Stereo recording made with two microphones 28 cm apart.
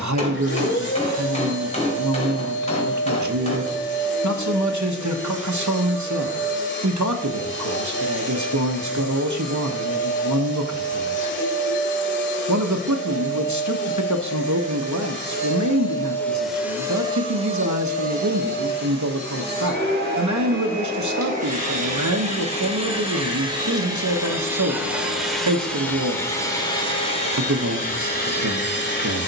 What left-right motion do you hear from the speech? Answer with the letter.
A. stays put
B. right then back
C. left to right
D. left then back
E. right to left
A.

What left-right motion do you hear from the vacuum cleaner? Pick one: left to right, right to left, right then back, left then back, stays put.
right then back.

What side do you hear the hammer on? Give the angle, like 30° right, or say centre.
20° left.